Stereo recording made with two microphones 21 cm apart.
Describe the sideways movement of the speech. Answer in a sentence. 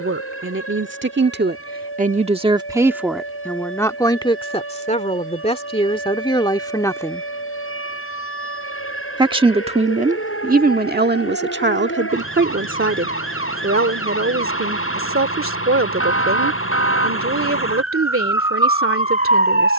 You can hear the speech go left and come back.